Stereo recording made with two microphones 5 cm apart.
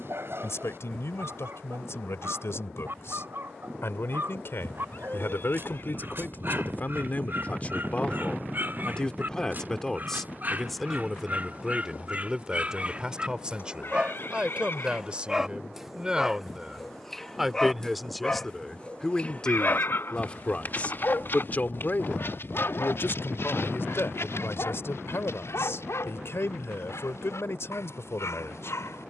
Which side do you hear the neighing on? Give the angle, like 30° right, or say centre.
50° left.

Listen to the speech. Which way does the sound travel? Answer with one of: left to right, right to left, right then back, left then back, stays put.
right then back.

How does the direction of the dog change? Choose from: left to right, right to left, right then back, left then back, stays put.
right to left.